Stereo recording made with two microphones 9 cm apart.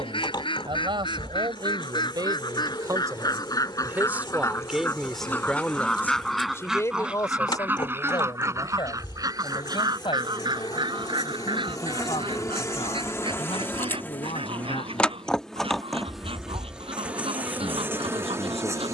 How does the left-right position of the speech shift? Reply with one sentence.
You can hear the speech move to the left.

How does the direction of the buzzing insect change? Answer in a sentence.
You can hear the buzzing insect go from the left side to the right.